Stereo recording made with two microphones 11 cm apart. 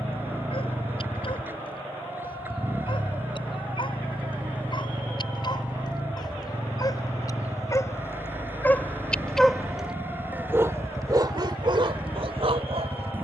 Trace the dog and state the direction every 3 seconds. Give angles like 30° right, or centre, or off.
50° left, 50° left, 30° left, 20° right, 60° right.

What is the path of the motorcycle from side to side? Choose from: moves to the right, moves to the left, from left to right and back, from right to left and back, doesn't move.
doesn't move.